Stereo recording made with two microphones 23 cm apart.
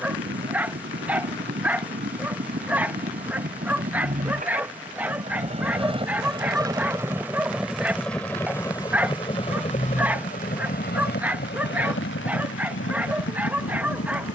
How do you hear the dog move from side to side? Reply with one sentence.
You can hear the dog stay put.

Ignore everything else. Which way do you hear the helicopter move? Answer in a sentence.
You can hear the helicopter travel towards the left.